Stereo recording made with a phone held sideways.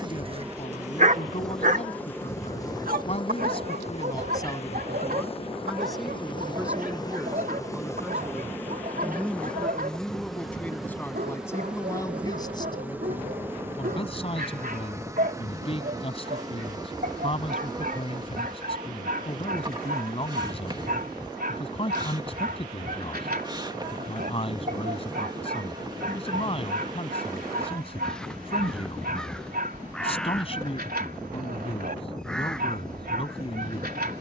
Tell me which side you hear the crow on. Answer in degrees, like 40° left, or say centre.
centre.